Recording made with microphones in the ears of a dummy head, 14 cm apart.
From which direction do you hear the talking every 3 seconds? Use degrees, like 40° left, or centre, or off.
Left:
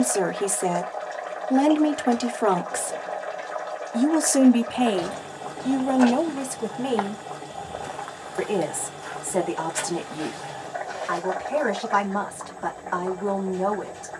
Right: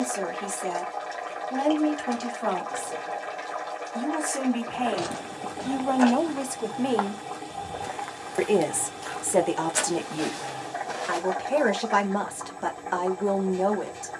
70° left, 40° left, 10° right, 30° right, 30° right.